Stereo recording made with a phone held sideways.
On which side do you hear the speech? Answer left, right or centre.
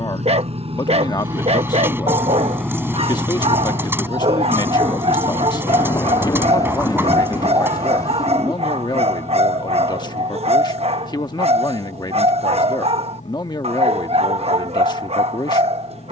left.